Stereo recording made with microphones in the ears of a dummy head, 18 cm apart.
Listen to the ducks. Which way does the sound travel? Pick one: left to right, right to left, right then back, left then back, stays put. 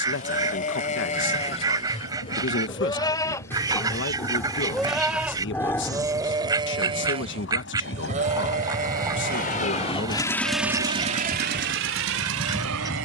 stays put.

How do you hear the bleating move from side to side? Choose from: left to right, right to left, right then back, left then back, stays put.
left to right.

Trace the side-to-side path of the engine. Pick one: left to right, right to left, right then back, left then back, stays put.
left to right.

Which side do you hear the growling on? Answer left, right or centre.
centre.